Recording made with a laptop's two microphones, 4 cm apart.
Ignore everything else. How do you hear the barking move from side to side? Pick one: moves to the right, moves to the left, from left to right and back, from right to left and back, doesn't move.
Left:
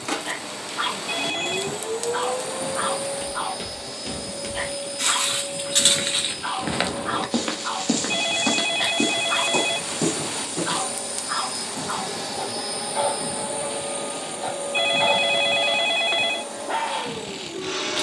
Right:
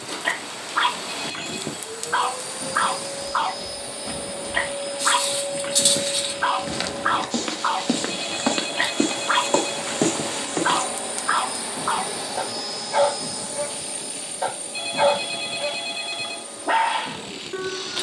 doesn't move.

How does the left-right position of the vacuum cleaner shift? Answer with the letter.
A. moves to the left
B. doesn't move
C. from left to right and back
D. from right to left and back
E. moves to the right
C.